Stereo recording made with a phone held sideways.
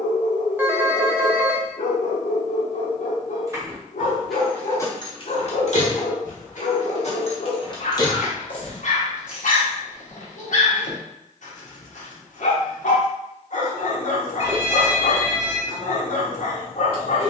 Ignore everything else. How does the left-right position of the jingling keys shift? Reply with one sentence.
In this clip you hear the jingling keys go left and come back.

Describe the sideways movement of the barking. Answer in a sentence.
In this clip you hear the barking stay in one place.